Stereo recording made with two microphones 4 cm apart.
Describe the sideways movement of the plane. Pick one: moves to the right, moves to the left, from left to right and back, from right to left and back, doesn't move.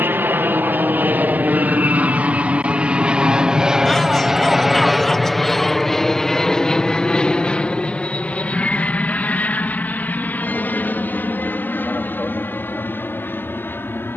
moves to the left.